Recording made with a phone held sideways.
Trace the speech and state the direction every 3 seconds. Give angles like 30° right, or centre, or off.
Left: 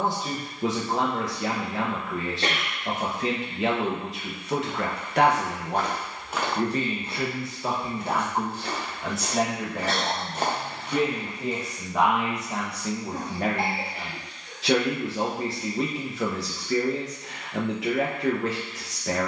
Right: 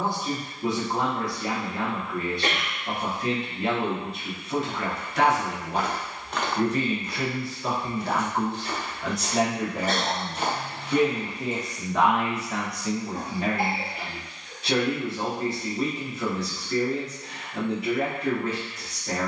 80° left, 60° left, 20° left, centre, 50° left, 70° left, 70° left.